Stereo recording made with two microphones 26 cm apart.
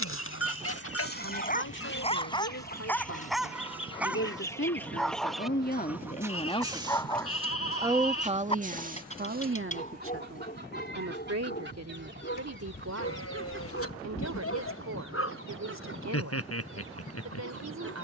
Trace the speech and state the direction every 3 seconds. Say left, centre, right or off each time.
left, left, centre, right, right, right.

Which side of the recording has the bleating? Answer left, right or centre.
left.